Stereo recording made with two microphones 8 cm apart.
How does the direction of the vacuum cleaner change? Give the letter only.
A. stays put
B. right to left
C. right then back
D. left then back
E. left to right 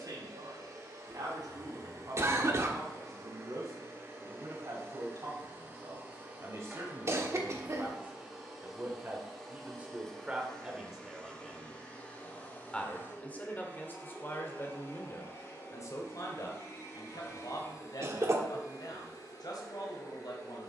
B.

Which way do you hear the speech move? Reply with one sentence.
You can hear the speech travel towards the left.